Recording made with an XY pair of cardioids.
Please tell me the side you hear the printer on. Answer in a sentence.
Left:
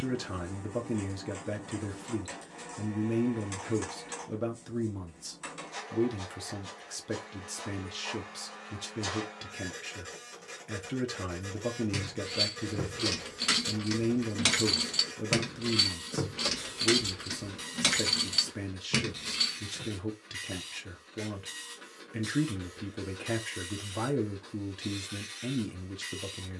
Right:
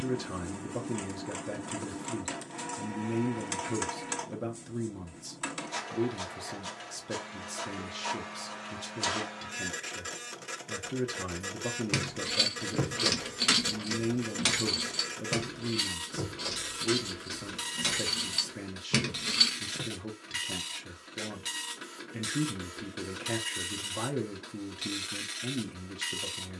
You can hear the printer on the right.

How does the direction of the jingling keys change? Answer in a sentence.
You can hear the jingling keys move from right to left and back again.